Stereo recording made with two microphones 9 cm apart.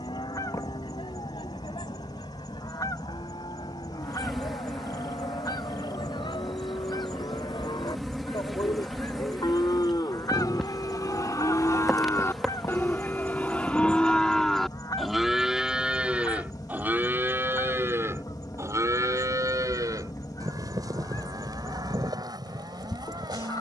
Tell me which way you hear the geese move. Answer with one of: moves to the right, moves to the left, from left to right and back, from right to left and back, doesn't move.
doesn't move.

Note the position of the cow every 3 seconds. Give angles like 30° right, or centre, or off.
80° left, 70° left, 70° left, 50° left, 20° left, 20° right, 40° right, 50° right.